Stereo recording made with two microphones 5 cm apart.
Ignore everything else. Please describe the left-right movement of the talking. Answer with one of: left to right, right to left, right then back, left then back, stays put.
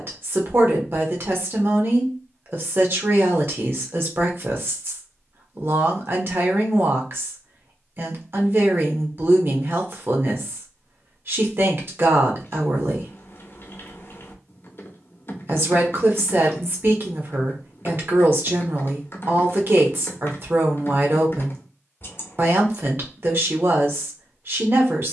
stays put.